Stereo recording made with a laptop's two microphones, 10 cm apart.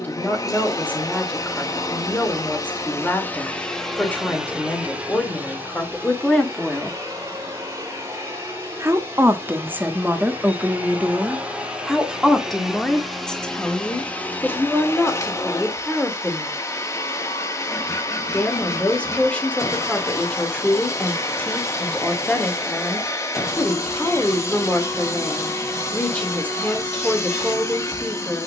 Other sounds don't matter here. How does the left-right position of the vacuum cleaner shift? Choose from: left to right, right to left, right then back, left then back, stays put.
right then back.